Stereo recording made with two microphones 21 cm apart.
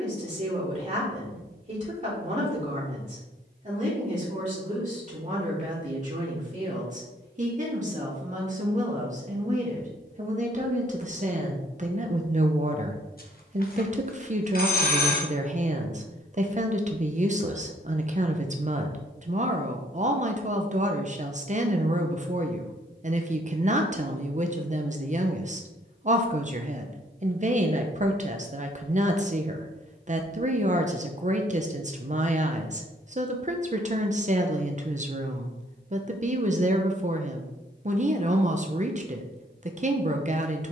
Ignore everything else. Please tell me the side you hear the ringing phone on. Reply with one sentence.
In this clip you hear the ringing phone on the left.